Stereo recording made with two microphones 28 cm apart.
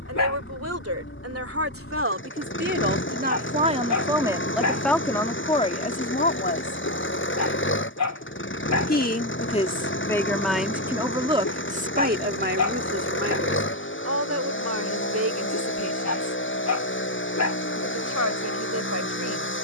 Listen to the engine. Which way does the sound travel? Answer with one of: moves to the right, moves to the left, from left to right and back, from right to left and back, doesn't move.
doesn't move.